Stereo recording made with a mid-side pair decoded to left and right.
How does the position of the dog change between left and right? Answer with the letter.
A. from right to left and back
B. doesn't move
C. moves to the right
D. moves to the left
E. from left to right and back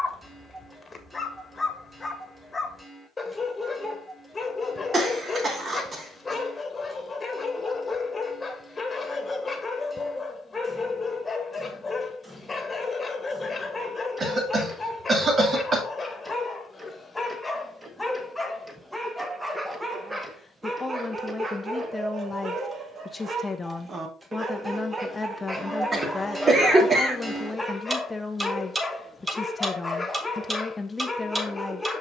E.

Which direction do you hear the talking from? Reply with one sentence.
You can hear the talking in the centre.